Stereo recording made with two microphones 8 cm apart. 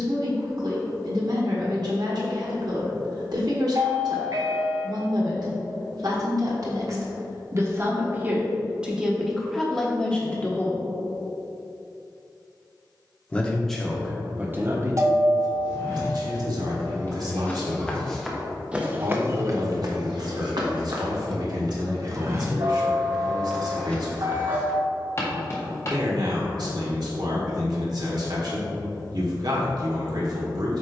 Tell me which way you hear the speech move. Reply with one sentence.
You can hear the speech move from right to left and back again.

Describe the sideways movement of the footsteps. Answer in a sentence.
You can hear the footsteps move from left to right and back again.